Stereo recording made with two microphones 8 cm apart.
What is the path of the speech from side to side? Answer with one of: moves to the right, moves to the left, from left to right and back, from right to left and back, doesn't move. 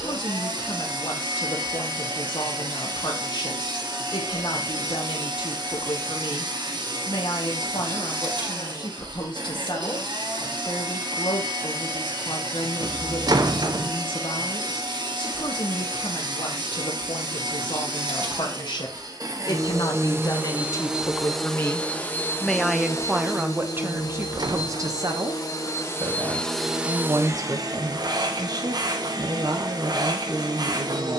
moves to the right.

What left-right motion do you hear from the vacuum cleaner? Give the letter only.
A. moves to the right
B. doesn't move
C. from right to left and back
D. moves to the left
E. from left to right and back
C.